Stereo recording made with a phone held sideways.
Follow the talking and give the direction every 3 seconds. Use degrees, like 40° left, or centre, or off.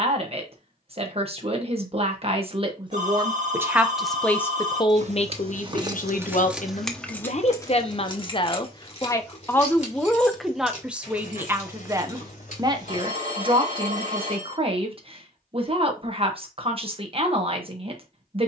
40° right, 20° left, 40° left, centre, 30° right, 40° right.